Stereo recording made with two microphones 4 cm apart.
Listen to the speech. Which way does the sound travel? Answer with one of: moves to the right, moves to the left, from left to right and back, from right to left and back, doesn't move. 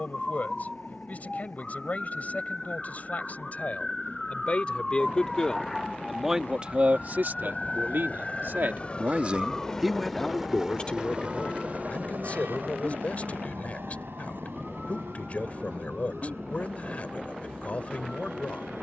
from left to right and back.